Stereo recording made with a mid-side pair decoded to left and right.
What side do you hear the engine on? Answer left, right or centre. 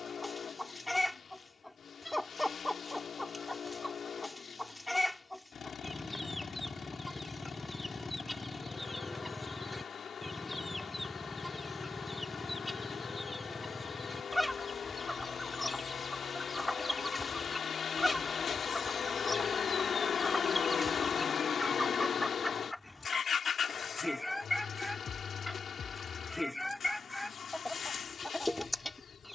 left.